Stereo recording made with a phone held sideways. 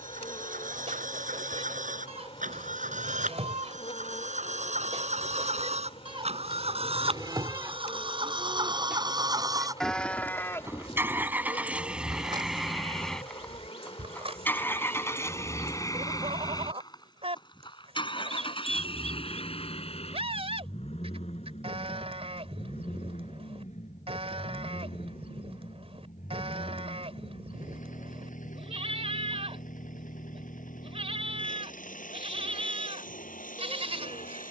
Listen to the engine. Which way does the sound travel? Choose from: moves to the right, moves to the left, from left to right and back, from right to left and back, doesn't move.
moves to the left.